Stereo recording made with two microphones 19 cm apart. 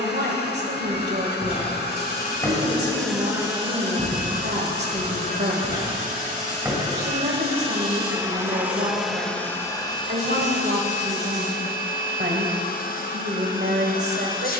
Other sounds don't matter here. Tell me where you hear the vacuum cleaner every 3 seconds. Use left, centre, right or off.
left, right, right, left, left.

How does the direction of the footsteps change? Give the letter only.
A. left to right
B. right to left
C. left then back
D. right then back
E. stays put
D.